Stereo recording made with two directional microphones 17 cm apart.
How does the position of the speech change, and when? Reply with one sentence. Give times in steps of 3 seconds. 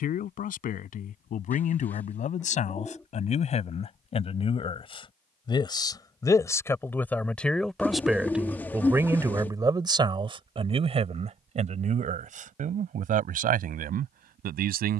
In this clip you hear the speech on the left from 0 s, in the centre from 6 s and on the right from 9 s.